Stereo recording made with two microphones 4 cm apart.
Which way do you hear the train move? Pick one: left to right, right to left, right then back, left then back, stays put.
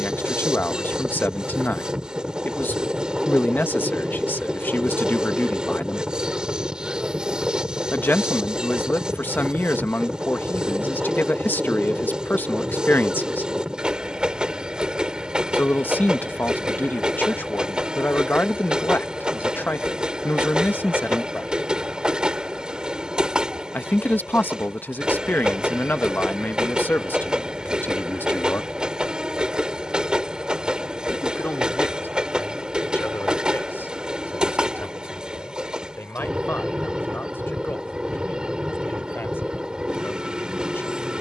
stays put.